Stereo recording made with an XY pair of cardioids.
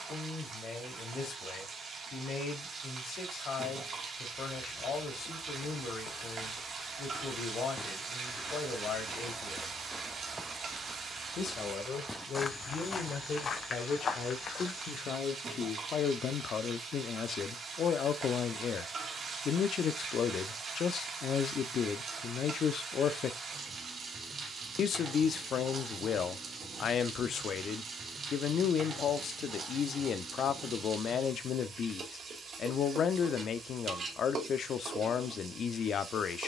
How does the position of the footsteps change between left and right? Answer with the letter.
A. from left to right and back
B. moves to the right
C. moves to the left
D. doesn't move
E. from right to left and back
A.